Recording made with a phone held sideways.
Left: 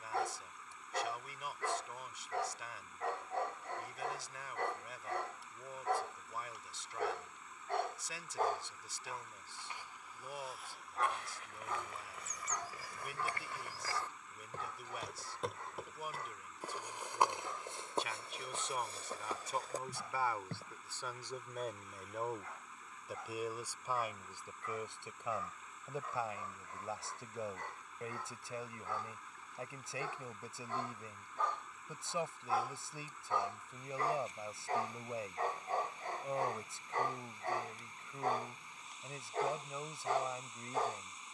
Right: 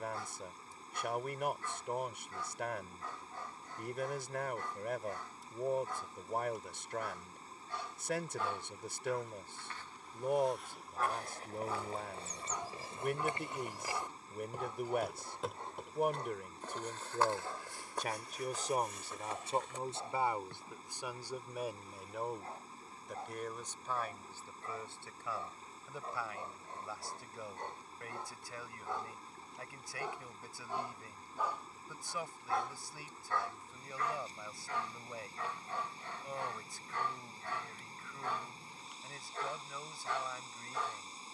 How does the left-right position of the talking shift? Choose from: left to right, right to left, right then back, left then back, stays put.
right to left.